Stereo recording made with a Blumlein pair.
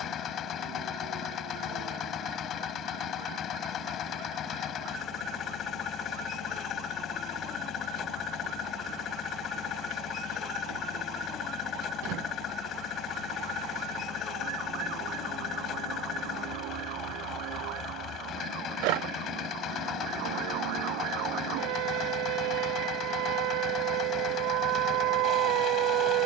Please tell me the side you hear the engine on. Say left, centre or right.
left.